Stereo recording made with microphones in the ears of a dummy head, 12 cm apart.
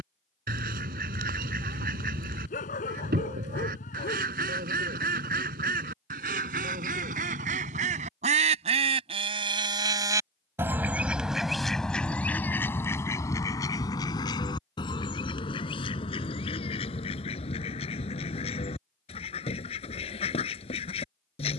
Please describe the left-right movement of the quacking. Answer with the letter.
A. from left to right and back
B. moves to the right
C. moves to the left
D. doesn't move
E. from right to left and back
C.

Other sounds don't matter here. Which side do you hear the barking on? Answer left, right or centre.
left.